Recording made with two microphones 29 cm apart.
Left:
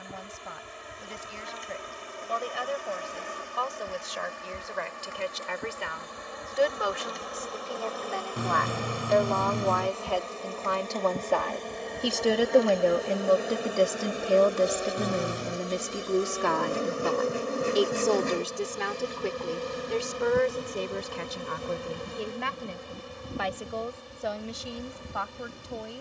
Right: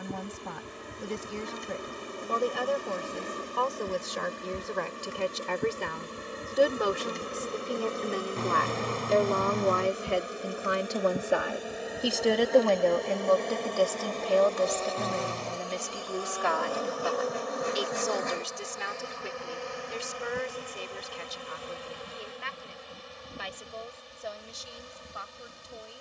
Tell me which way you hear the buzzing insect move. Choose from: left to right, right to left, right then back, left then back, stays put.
right to left.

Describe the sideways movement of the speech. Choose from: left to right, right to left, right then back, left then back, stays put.
right to left.